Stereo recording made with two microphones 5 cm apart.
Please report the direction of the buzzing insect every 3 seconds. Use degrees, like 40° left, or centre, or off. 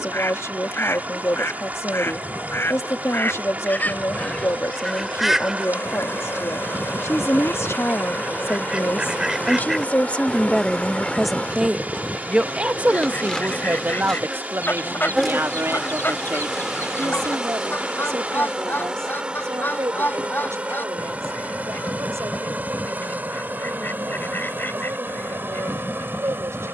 60° left, 50° left, 40° left, 30° left, 10° left, 10° right, 20° right, 30° right, 40° right.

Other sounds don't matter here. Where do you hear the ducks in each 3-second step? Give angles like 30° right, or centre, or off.
50° left, 20° left, 30° right, centre, 40° left, 40° left, 40° left, 40° left, 40° left.